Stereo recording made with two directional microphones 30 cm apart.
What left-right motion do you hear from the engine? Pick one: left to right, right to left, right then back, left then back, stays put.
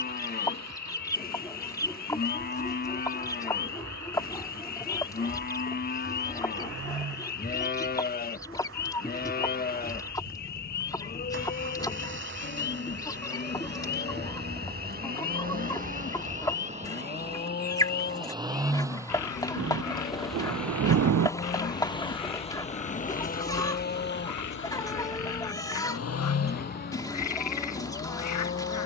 right to left.